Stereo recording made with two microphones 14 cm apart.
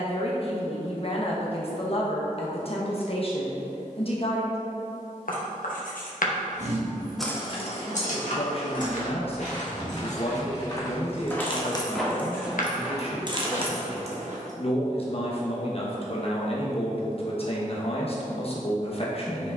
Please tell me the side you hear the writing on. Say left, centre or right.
left.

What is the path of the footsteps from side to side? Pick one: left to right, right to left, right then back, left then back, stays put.
left to right.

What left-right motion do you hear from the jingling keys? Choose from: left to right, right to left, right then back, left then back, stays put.
left then back.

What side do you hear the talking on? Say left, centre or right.
left.